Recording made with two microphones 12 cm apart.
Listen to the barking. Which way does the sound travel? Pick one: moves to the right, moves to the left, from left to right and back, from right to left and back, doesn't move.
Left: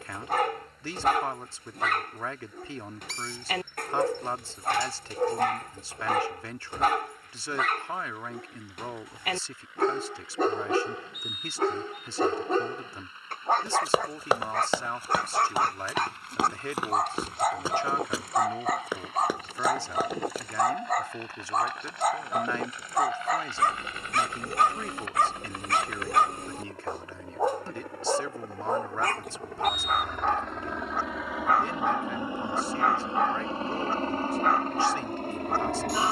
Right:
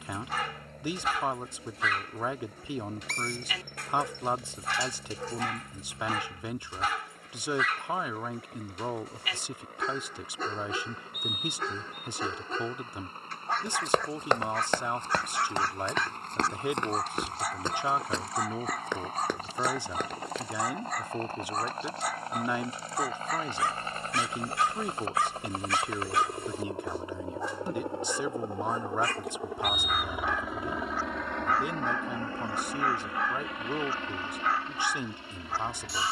doesn't move.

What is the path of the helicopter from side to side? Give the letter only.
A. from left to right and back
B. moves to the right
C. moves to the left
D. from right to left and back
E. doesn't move
C.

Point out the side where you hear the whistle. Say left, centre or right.
right.